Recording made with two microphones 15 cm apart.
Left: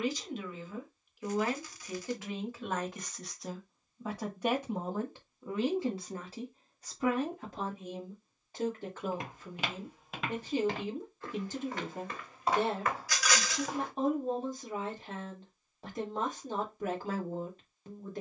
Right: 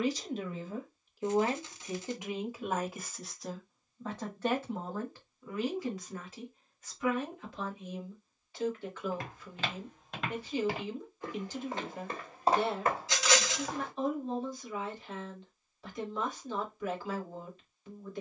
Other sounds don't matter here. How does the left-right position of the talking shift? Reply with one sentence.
You can hear the talking move to the left.